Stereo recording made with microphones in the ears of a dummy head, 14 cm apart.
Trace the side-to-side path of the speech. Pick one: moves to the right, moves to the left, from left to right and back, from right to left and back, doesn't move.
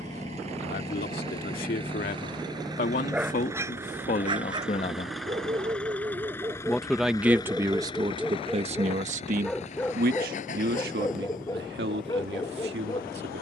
moves to the right.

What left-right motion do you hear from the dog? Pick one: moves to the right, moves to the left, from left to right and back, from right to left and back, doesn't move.
from left to right and back.